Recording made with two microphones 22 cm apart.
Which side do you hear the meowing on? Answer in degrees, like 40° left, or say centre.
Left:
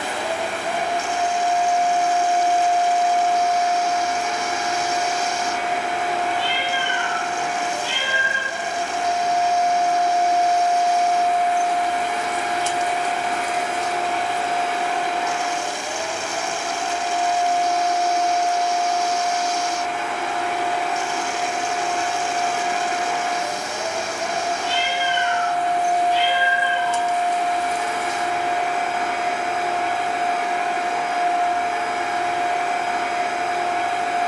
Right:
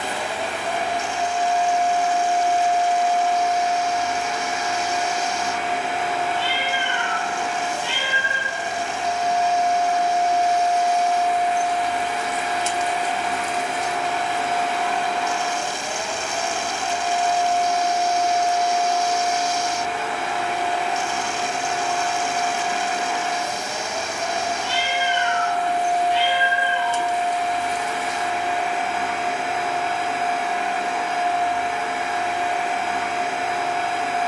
70° right.